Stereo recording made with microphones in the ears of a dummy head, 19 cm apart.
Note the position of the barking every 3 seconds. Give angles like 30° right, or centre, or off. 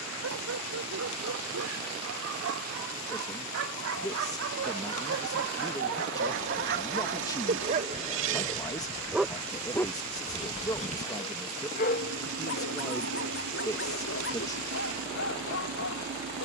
80° right, 70° right, 40° right, 20° left, 60° left, 70° left.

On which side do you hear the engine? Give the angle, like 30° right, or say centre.
60° right.